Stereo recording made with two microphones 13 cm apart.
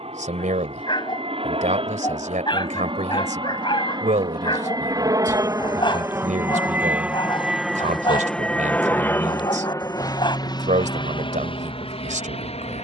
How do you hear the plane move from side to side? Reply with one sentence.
In this clip you hear the plane move from right to left.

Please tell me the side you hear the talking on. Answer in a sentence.
You can hear the talking on the right.